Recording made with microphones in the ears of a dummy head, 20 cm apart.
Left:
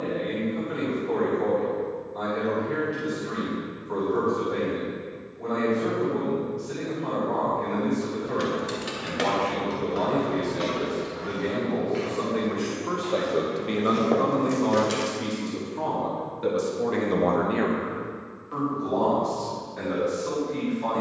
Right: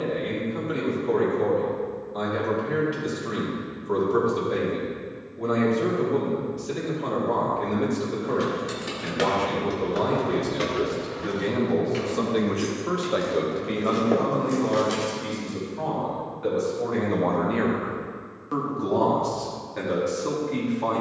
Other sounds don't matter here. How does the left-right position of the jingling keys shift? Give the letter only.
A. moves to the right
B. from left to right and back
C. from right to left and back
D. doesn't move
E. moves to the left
B.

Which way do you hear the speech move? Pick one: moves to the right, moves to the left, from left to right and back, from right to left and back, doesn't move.
from right to left and back.